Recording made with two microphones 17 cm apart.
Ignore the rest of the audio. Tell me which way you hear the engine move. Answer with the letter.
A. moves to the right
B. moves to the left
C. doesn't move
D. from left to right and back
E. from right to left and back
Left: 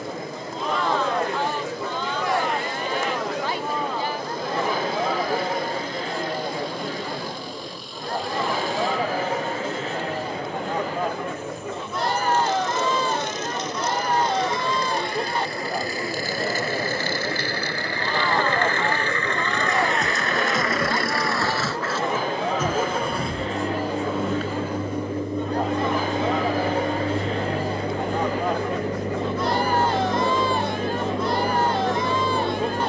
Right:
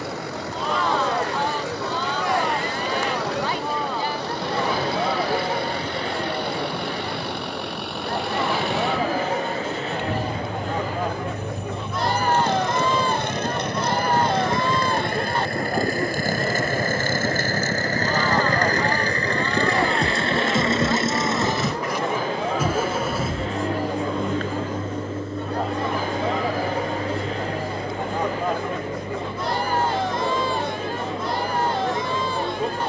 B.